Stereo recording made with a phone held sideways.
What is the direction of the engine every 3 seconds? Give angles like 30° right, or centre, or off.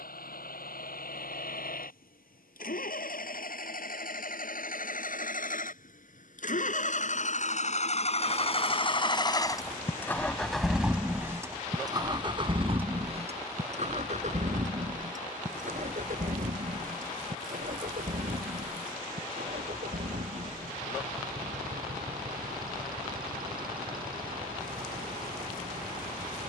80° left, 70° left, 50° left, centre, 50° right, 60° right, 70° right, 70° right, 80° right.